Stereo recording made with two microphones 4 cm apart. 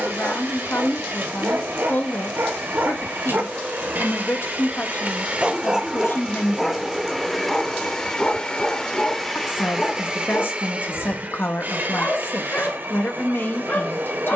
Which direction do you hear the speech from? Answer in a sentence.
You can hear the speech on the left.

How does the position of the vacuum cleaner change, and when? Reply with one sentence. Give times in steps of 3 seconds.
In this clip you hear the vacuum cleaner on the right from 0 s, in the centre from 6 s and on the right from 9 s.